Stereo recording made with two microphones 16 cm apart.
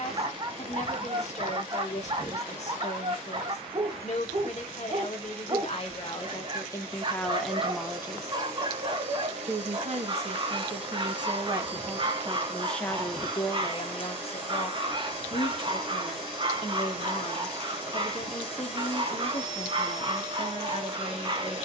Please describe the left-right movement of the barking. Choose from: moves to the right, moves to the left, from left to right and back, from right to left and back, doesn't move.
doesn't move.